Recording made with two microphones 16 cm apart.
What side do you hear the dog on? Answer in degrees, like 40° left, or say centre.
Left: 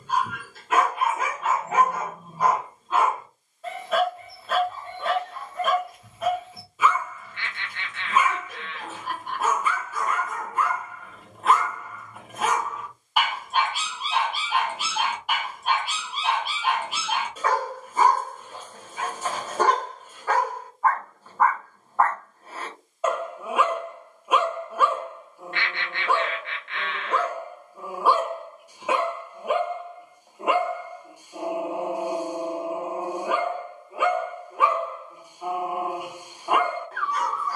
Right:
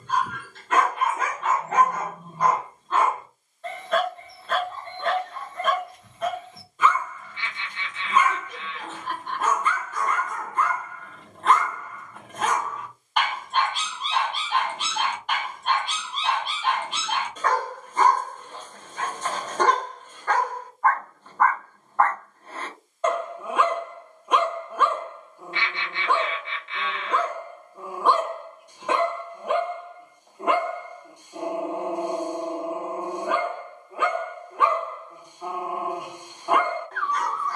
10° left.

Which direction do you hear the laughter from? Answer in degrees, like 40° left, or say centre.
60° left.